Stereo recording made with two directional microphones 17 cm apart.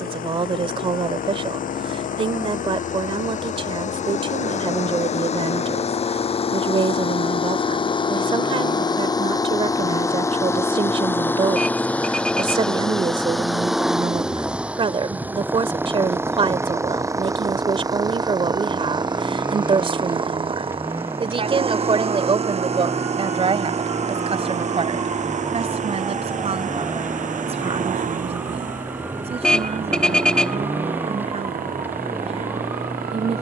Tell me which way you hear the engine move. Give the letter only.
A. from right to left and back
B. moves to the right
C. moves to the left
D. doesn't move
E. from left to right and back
B.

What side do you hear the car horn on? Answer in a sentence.
In this clip you hear the car horn in the centre.